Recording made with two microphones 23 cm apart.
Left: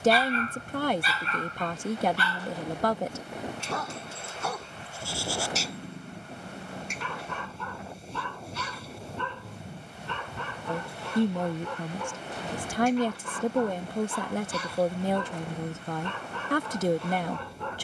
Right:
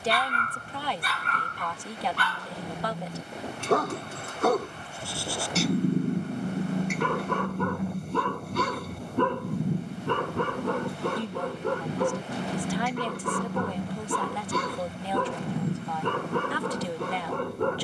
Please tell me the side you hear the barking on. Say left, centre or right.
right.